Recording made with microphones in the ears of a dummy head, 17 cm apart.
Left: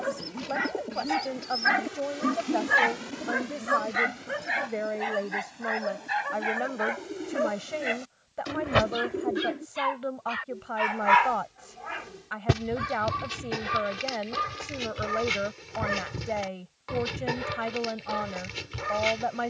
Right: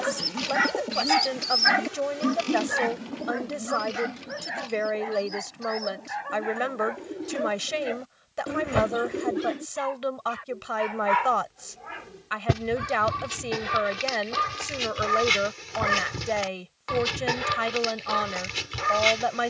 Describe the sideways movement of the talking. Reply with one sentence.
In this clip you hear the talking stay put.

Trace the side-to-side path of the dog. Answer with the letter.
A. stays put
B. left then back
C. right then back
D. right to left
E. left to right
B.